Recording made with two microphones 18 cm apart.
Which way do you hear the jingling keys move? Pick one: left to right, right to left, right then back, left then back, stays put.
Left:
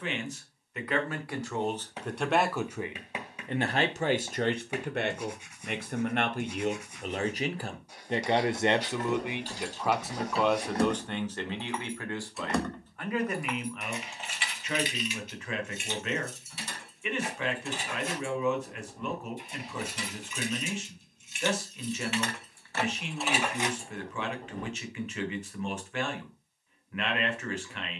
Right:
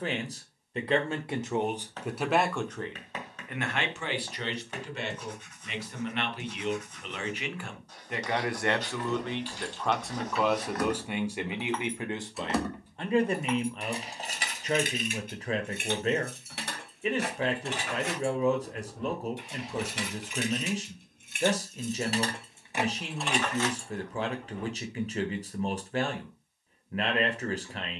right then back.